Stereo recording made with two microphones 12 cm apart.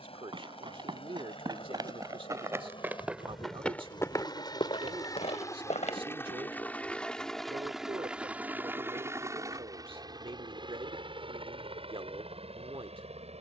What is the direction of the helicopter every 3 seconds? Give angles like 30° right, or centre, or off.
50° left, 40° left, centre, 40° right, 60° right.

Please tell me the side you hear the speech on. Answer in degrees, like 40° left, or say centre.
50° right.